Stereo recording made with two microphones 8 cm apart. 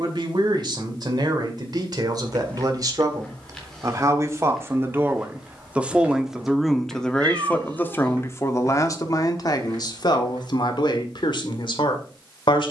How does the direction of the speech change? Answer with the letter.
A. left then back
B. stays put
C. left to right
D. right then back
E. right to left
E.